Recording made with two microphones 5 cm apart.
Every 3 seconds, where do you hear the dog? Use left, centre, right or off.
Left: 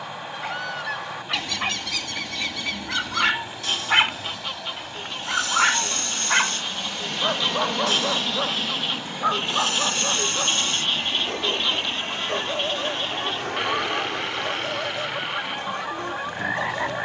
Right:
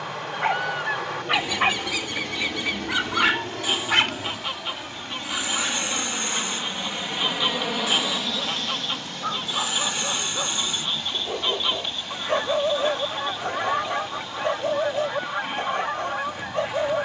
right, left, left, centre, right, right.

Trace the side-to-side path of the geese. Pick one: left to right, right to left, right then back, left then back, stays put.
stays put.